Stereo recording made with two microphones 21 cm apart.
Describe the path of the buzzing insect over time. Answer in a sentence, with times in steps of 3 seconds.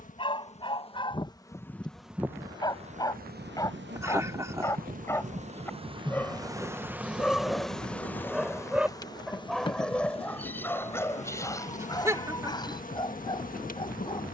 In this clip you hear the buzzing insect in the centre from 0 s, on the right from 3 s, in the centre from 6 s and on the left from 9 s.